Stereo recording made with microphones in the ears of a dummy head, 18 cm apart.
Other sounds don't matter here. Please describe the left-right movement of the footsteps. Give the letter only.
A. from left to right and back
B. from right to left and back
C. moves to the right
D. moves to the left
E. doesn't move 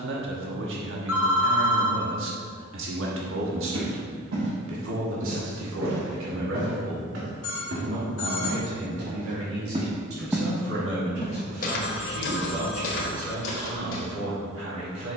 D.